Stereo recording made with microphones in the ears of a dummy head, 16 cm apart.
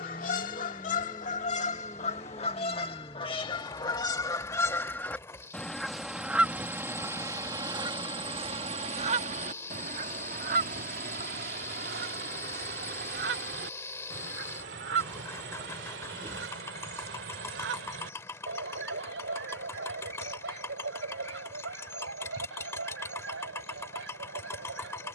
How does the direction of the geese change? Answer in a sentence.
You can hear the geese travel towards the right.